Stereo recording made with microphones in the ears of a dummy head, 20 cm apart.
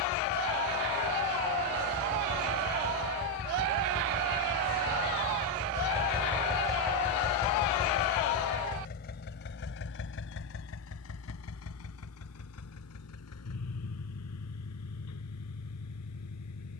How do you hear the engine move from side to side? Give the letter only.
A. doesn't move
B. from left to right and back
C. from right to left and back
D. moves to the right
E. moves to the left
E.